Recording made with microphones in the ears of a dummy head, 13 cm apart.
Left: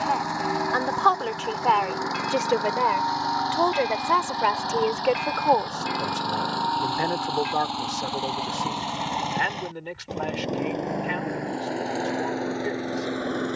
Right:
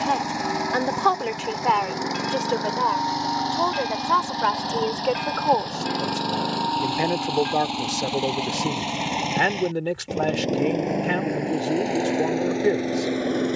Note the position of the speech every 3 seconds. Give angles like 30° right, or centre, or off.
10° right, 10° left, 30° right, 50° right, 50° right.